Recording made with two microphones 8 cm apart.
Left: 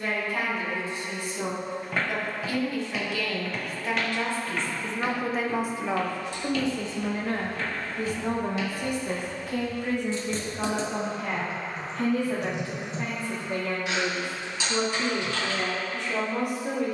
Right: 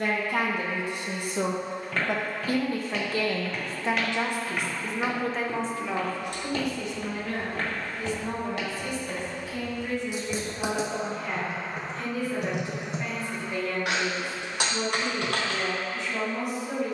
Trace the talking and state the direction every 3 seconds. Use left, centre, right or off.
right, centre, left, left, left, left.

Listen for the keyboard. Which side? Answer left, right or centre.
right.